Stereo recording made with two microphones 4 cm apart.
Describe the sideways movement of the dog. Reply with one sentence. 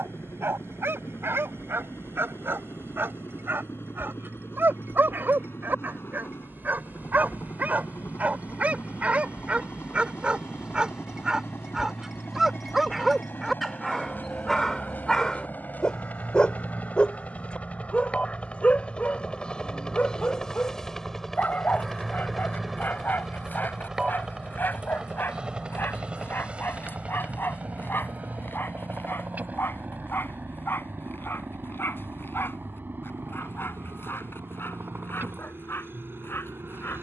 You can hear the dog go from the right side to the left.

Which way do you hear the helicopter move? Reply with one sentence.
In this clip you hear the helicopter move from left to right.